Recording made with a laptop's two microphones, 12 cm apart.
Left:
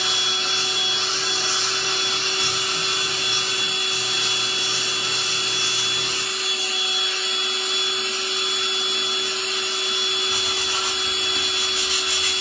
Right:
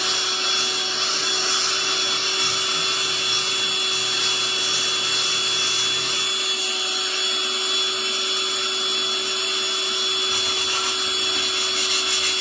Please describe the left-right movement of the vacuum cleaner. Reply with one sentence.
In this clip you hear the vacuum cleaner stay in one place.